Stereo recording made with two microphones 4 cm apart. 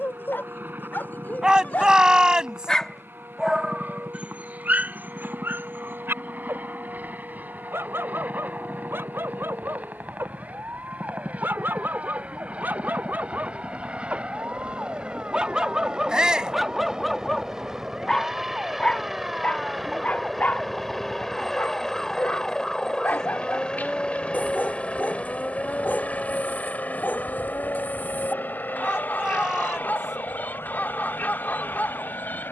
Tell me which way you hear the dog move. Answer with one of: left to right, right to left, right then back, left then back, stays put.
right then back.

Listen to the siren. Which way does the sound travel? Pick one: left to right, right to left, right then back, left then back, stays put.
right to left.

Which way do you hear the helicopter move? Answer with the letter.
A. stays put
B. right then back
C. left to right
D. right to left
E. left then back
D.